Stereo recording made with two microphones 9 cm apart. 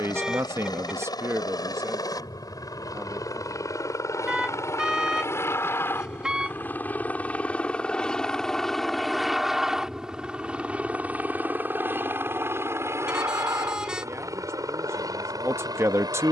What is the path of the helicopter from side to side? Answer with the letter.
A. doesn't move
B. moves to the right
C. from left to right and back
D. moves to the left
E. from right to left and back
B.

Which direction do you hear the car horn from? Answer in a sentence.
In this clip you hear the car horn in the centre.